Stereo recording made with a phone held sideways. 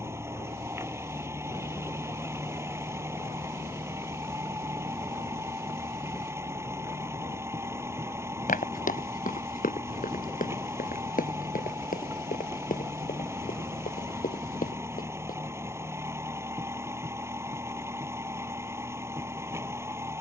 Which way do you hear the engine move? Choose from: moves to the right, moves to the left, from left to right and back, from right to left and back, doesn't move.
doesn't move.